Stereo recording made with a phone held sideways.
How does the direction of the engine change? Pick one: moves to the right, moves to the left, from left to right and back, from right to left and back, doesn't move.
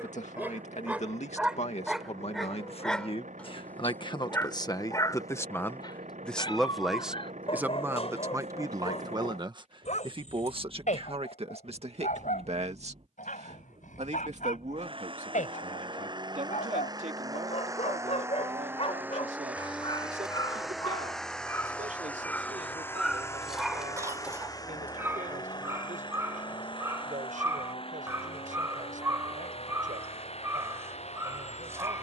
moves to the left.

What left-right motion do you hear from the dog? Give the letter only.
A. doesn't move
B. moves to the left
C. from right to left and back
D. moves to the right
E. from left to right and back
C.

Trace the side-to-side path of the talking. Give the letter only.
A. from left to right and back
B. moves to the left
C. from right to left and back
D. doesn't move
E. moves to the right
E.